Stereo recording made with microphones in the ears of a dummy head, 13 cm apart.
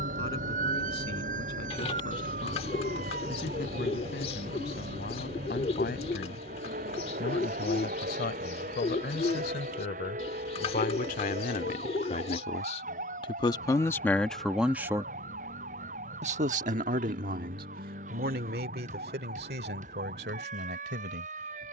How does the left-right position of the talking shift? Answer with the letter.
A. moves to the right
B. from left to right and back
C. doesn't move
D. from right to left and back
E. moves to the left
A.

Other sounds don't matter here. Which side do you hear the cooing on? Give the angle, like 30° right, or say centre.
40° left.